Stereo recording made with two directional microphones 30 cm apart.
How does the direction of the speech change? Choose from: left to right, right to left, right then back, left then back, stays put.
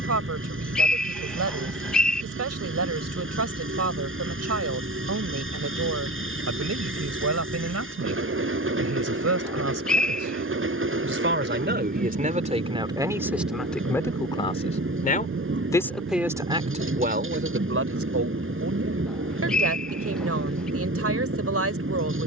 left then back.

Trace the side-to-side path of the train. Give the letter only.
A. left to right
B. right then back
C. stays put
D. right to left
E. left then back
C.